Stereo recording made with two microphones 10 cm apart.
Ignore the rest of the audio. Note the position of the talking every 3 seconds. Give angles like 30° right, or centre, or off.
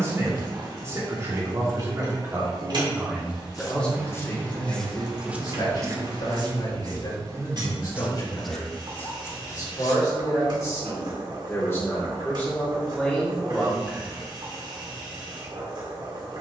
30° right, 30° left, 50° left, 30° left, 10° left, off.